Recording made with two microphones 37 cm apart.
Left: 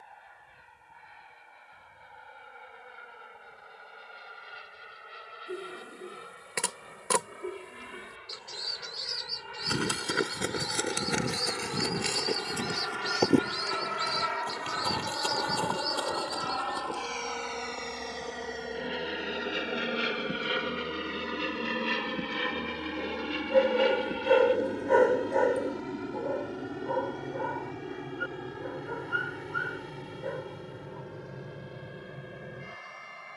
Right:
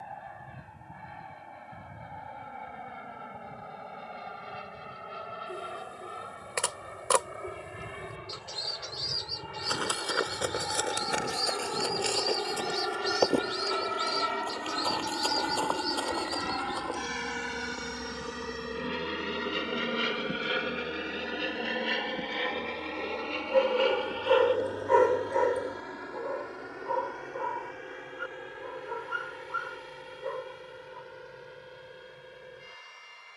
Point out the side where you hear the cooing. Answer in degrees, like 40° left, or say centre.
30° left.